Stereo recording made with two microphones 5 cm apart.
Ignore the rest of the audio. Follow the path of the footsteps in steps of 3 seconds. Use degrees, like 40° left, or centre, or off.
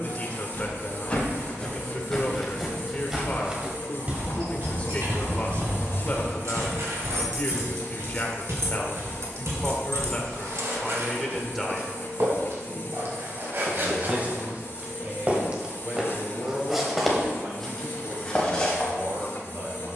20° left, 30° right, 70° right, 70° right, 50° right, 10° right, 20° left.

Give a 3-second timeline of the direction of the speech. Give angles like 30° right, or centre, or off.
30° left, 30° left, 30° left, 10° left, 30° right, 40° right, 50° right.